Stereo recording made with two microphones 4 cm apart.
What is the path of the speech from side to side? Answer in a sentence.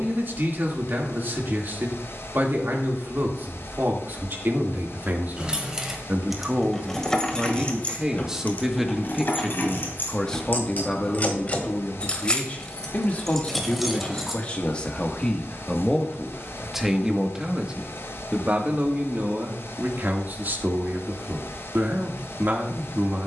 You can hear the speech move from right to left and back again.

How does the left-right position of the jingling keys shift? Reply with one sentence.
In this clip you hear the jingling keys move from right to left and back again.